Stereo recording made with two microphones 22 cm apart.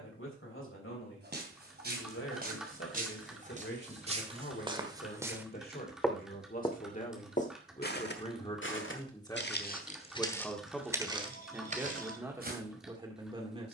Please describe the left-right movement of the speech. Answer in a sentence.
In this clip you hear the speech travel towards the right.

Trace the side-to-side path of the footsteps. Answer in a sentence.
You can hear the footsteps go left and come back.